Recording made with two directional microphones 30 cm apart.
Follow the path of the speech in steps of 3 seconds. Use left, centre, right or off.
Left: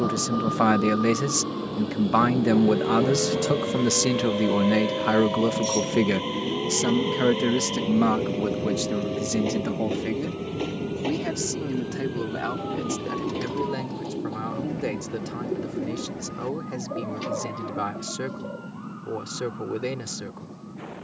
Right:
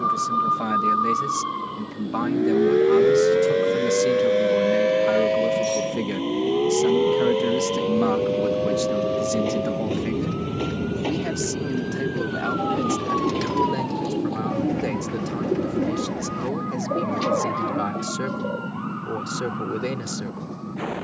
left, left, left, centre, centre, centre, centre.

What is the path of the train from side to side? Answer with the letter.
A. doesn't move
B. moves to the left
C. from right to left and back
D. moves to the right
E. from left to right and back
D.